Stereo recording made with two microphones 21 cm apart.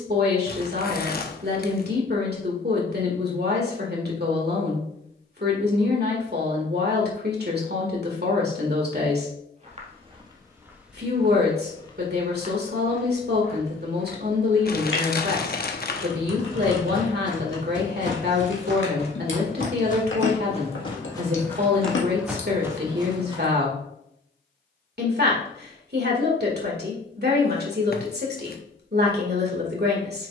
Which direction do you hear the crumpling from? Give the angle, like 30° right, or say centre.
50° left.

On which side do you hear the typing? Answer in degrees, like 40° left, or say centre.
70° left.